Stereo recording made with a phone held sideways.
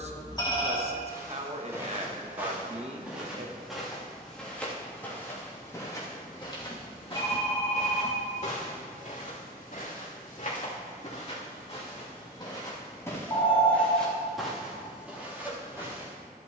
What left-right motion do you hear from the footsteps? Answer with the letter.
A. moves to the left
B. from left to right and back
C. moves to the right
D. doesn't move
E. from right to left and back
E.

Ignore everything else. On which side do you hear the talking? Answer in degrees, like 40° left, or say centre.
40° right.